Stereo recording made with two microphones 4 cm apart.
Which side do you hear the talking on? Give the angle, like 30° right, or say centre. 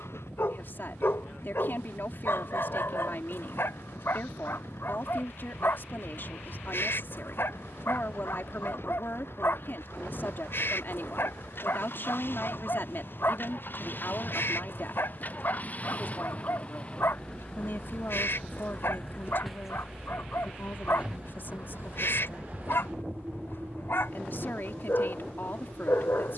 60° left.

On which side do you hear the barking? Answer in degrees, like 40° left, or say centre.
70° left.